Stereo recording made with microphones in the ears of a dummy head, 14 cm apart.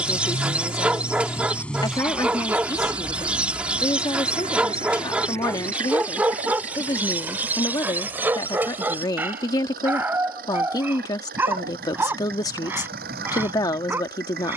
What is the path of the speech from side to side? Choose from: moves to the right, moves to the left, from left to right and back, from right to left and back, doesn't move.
doesn't move.